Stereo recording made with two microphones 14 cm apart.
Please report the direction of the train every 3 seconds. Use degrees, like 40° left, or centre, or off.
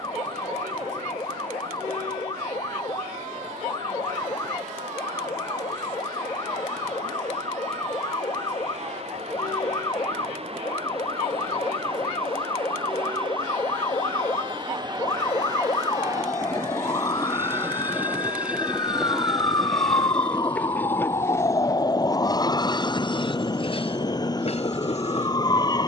60° right, 60° right, 50° right, 50° right, 40° right, 20° right, centre, 30° left, 50° left.